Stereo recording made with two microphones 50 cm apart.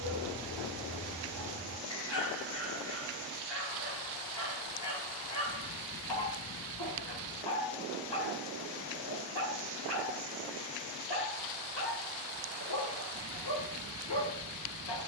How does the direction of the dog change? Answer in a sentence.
In this clip you hear the dog stay put.